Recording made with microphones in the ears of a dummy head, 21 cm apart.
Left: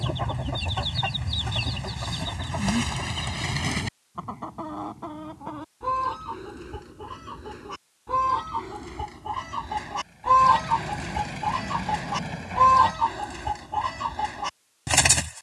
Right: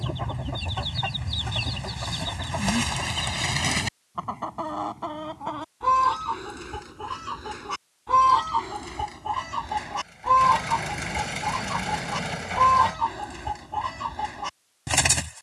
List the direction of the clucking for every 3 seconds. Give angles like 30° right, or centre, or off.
10° right, 40° right, 50° right, 10° right, centre.